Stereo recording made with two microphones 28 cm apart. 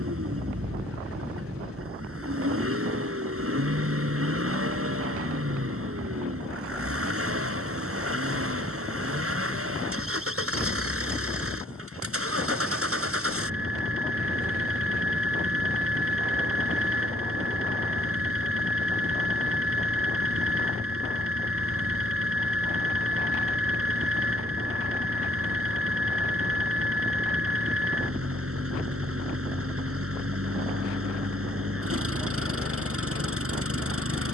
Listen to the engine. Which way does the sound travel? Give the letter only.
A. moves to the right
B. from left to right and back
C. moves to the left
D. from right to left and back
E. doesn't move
E.